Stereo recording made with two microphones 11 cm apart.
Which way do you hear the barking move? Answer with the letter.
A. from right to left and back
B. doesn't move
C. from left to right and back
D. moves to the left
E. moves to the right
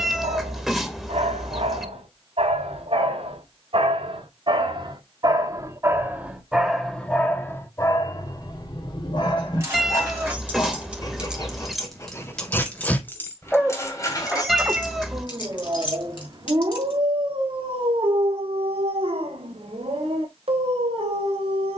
A.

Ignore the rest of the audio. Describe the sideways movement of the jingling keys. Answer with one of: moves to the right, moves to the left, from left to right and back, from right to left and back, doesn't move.
moves to the left.